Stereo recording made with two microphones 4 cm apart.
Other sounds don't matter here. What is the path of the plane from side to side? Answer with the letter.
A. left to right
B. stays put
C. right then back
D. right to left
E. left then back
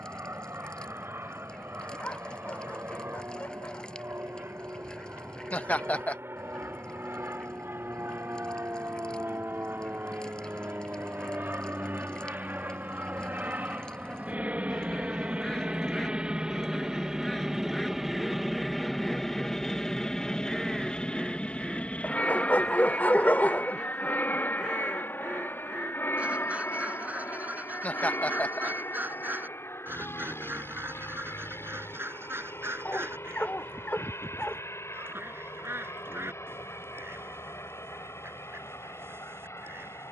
D.